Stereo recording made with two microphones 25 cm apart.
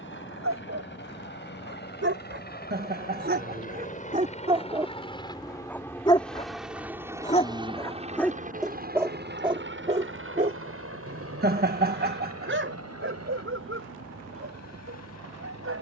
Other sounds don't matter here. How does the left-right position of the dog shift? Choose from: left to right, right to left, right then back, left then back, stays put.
left then back.